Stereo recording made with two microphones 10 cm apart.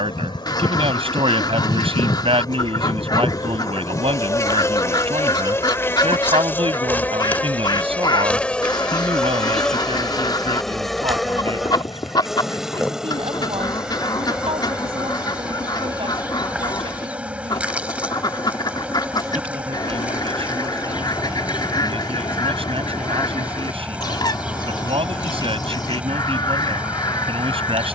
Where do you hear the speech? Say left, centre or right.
right.